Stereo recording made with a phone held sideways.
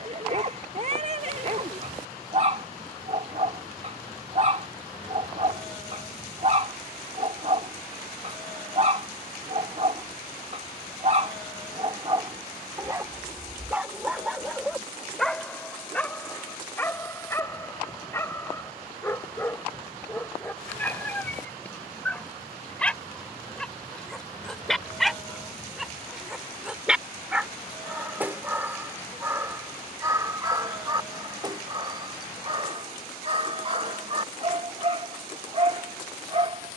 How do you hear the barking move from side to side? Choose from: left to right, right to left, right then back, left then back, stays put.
left then back.